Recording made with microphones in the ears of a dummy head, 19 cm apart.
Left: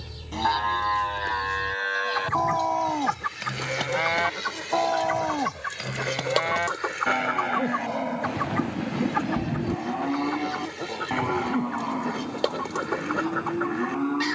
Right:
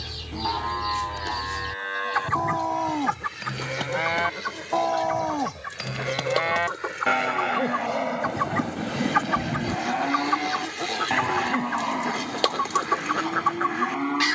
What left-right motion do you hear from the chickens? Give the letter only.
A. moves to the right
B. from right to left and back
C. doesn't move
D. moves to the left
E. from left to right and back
B.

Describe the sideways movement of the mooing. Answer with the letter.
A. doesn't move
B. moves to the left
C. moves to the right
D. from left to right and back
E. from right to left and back
C.